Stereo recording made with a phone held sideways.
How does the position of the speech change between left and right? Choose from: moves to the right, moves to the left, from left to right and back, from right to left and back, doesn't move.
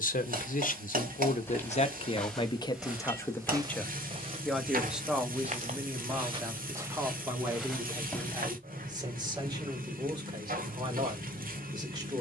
moves to the right.